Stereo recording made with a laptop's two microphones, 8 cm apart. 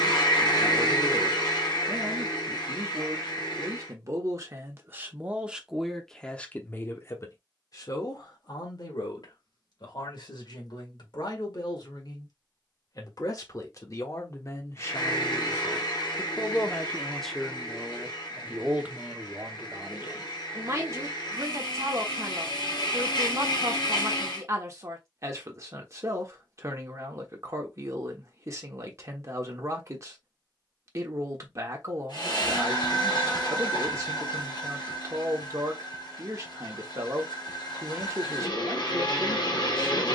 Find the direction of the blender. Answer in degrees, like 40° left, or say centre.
70° left.